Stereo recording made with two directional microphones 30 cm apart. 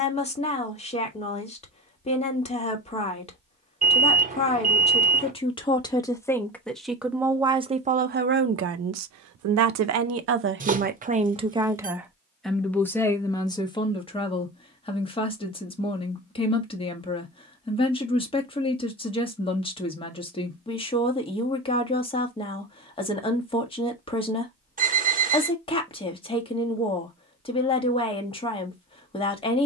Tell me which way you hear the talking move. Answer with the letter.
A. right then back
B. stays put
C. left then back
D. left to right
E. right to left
A.